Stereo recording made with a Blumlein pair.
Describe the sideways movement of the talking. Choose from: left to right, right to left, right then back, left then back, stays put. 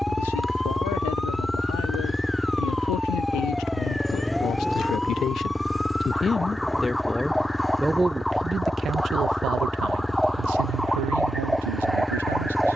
left to right.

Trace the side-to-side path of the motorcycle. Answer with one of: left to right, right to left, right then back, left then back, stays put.
stays put.